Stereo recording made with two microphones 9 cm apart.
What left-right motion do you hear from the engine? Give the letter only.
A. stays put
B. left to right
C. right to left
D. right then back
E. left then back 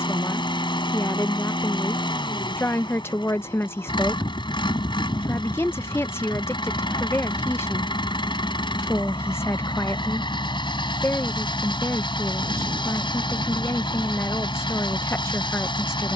A.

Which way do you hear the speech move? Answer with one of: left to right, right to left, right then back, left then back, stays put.
stays put.